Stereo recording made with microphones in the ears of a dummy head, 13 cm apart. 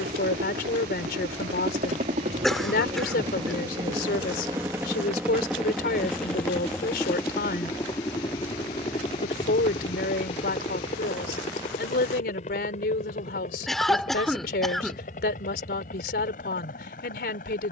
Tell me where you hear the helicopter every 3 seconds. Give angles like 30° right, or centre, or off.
50° right, 20° right, 20° left, 40° left, 50° left, 50° left.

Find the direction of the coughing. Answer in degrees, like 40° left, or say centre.
centre.